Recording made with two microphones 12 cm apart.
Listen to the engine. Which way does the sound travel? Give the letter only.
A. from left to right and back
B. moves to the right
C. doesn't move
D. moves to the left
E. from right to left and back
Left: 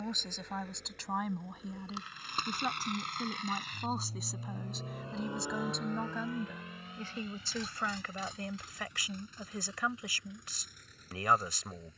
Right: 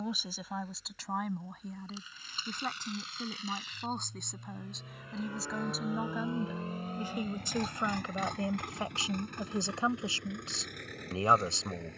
B.